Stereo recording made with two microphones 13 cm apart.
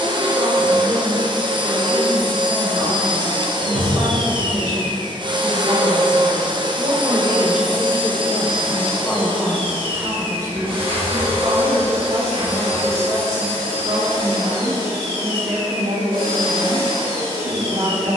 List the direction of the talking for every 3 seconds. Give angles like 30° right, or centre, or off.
50° right, 50° right, 10° right, 20° right, 50° right, 50° right.